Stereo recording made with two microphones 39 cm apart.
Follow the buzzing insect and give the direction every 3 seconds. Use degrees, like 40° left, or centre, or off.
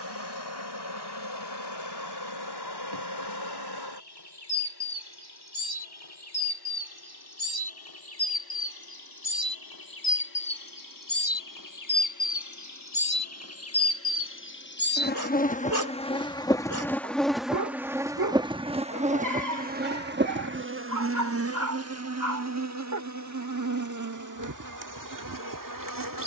80° left, 70° left, 70° left, 60° left, 40° left, 10° left, 20° right, 40° right, 50° right.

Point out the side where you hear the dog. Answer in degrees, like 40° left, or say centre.
50° right.